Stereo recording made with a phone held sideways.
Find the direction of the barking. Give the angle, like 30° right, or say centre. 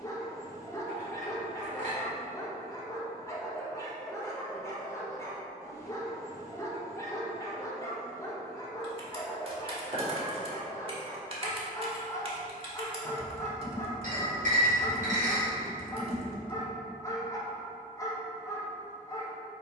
20° left.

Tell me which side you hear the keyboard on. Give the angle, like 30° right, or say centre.
40° right.